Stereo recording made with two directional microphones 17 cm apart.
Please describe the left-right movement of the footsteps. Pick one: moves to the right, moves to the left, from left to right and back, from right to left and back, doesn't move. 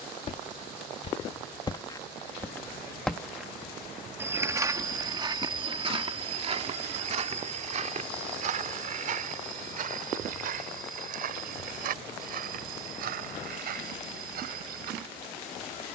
moves to the right.